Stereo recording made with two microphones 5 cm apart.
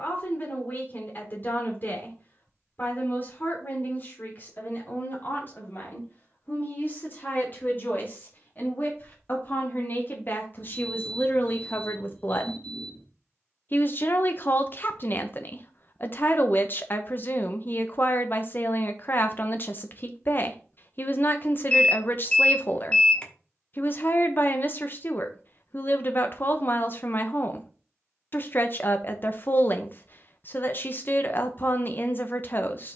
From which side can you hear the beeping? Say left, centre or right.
left.